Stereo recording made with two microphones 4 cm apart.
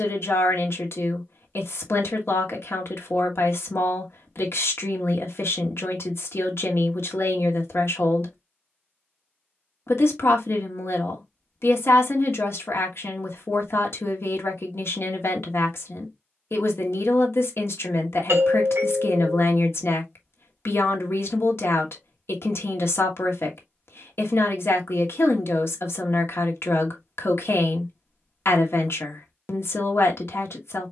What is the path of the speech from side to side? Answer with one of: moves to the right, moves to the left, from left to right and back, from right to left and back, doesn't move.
doesn't move.